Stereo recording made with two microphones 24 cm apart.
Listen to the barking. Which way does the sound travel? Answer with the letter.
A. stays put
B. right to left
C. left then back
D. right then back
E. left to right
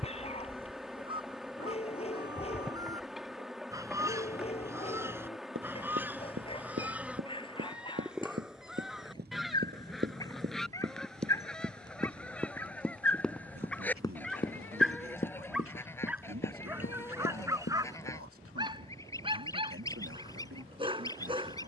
E.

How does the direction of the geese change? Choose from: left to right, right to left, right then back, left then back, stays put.
right to left.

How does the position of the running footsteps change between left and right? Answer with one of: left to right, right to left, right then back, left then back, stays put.
right to left.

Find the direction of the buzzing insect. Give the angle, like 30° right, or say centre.
centre.